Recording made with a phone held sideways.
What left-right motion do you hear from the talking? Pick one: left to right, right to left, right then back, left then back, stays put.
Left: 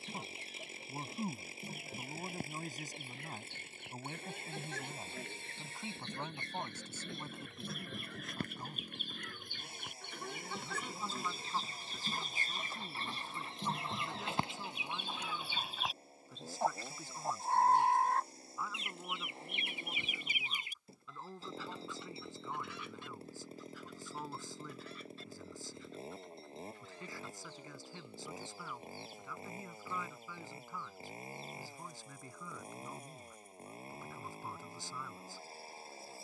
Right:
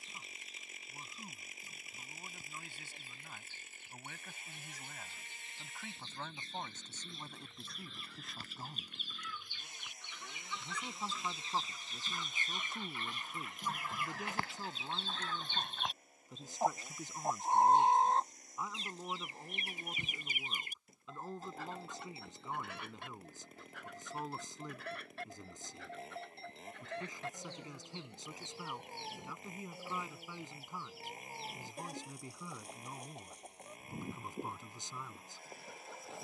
left to right.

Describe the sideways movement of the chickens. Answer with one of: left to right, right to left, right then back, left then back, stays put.
left to right.